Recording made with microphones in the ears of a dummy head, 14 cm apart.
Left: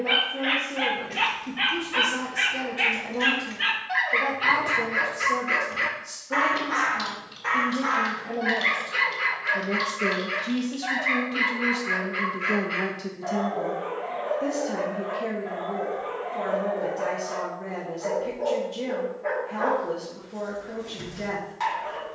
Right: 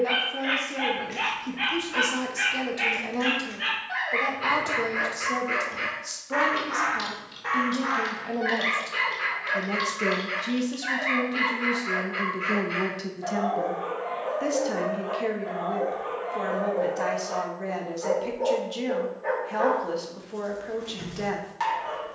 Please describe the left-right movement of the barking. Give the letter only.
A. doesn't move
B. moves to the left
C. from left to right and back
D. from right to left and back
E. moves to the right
E.